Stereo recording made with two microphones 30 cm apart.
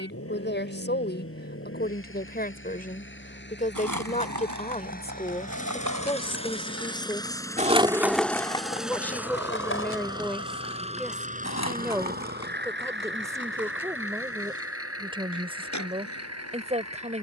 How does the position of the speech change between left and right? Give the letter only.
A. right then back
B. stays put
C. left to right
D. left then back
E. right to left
C.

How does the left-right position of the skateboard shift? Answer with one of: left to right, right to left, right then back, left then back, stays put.
right to left.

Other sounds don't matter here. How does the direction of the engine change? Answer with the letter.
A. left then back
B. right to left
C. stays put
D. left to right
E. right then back
D.